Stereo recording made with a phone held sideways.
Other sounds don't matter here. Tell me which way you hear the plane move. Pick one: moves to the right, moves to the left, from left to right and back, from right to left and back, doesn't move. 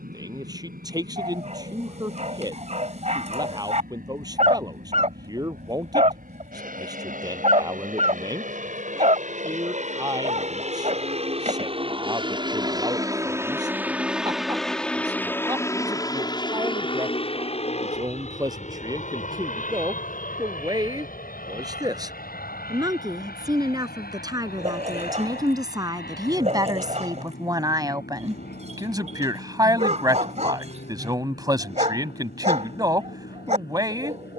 moves to the left.